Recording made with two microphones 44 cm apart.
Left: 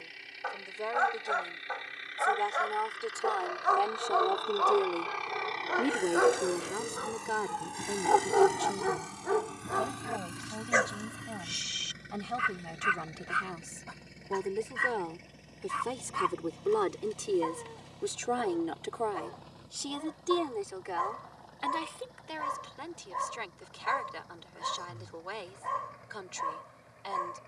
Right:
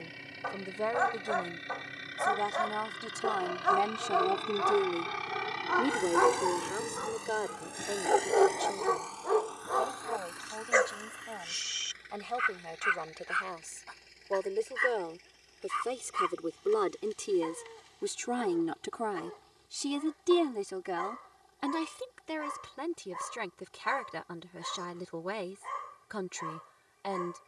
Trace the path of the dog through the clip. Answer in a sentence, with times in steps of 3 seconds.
You can hear the dog on the right from 0 s, in the centre from 6 s and on the left from 9 s.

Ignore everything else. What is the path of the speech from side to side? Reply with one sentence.
You can hear the speech move from right to left and back again.